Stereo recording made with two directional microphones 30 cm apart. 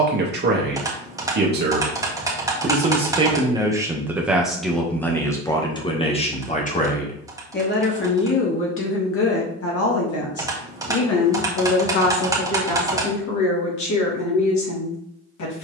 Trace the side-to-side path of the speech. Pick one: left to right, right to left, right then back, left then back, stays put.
right to left.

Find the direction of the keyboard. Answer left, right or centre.
centre.